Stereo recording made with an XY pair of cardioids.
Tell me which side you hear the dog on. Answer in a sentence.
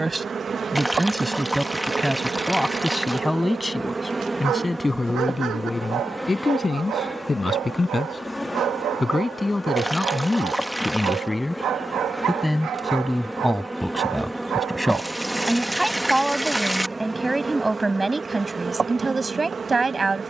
You can hear the dog on the right.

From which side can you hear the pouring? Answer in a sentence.
In this clip you hear the pouring in the centre.